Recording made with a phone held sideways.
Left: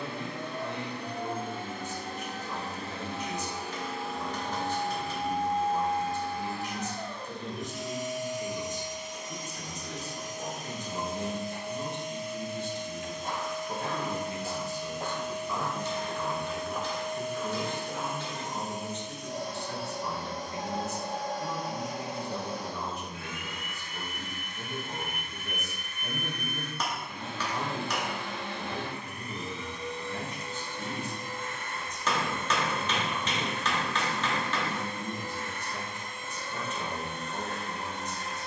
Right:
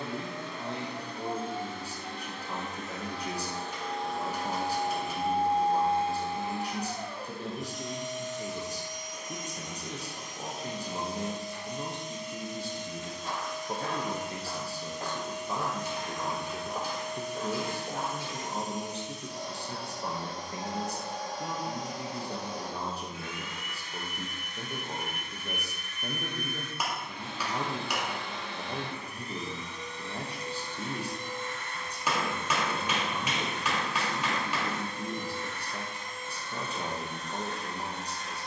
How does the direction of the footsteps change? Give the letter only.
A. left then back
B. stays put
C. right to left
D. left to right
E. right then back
D.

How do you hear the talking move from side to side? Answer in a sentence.
You can hear the talking stay in one place.